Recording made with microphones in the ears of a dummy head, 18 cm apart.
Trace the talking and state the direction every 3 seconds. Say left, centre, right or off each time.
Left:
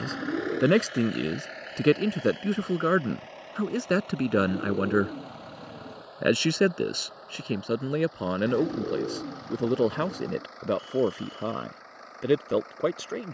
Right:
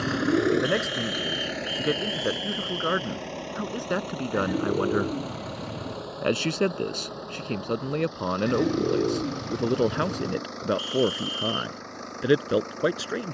left, left, centre, centre, centre.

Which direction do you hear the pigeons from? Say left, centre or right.
right.